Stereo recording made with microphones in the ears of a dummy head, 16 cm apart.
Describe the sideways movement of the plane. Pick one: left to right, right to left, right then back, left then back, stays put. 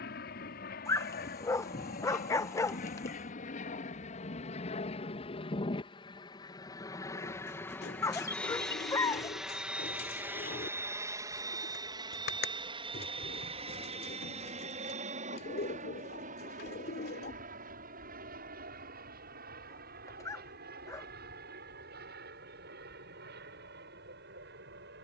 left to right.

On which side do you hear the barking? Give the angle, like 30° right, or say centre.
20° left.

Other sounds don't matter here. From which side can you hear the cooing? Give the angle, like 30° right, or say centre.
60° left.